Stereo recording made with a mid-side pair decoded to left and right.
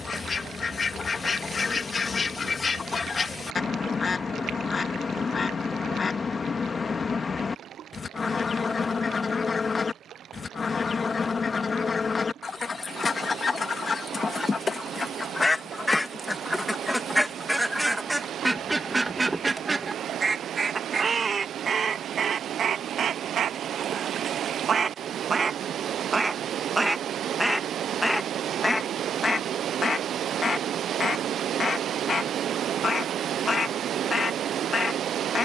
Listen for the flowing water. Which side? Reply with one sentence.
You can hear the flowing water on the right.